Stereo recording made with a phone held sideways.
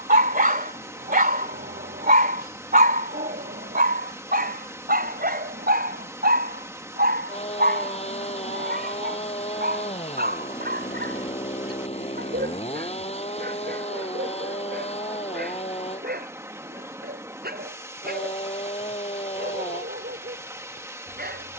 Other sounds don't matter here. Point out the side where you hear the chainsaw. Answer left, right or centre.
left.